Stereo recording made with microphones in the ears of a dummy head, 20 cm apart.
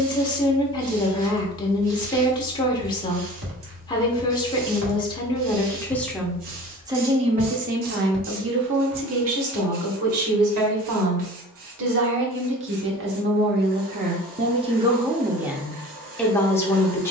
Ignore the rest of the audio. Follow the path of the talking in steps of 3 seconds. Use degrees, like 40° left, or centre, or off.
20° left, 20° left, 30° right, 70° right, 40° right, centre.